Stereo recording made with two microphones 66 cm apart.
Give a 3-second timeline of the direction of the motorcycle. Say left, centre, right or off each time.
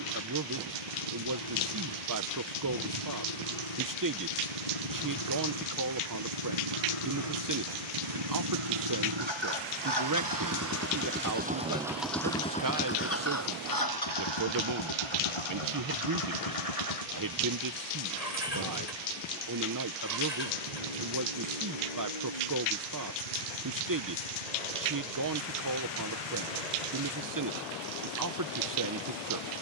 right, right, right, right, left, left, left, left, left, left.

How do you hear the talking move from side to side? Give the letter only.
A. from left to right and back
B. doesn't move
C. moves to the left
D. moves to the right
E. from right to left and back
B.